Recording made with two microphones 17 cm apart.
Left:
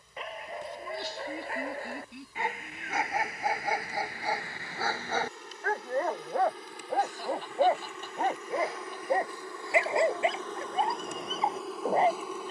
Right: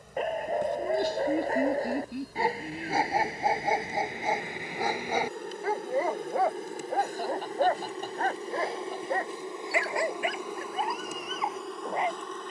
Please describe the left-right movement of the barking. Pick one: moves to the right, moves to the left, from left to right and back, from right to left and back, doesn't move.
moves to the left.